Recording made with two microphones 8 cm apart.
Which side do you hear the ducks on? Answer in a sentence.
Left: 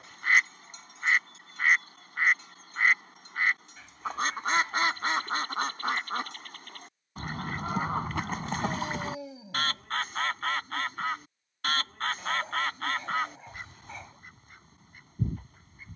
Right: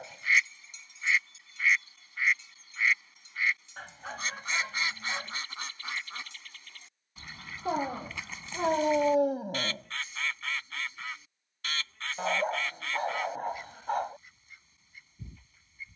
You can hear the ducks on the left.